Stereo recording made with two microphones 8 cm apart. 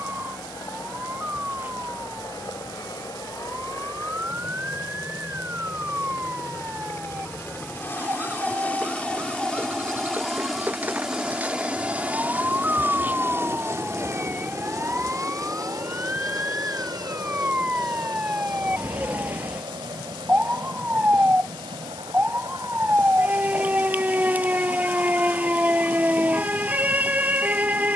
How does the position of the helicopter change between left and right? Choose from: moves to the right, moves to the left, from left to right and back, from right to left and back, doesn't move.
moves to the right.